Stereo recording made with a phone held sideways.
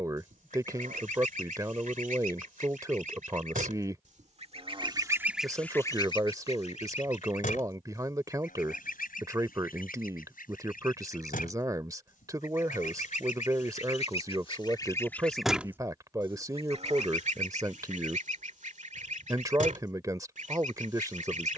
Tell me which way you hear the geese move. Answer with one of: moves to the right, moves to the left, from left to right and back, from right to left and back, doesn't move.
from right to left and back.